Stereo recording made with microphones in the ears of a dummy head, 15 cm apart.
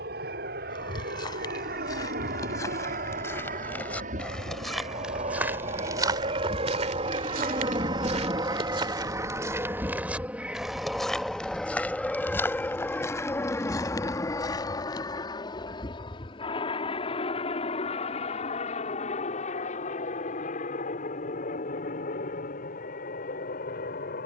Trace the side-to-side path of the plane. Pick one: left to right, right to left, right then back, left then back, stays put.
right to left.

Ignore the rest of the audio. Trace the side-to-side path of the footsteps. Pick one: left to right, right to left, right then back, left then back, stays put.
right then back.